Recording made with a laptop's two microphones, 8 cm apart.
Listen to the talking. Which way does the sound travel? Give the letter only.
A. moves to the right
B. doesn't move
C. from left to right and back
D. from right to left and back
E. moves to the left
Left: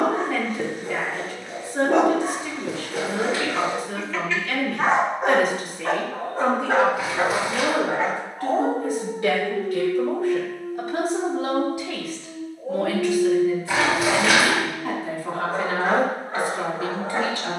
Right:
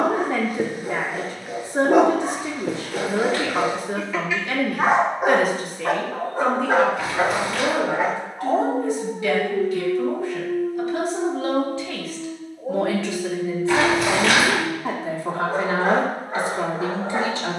D.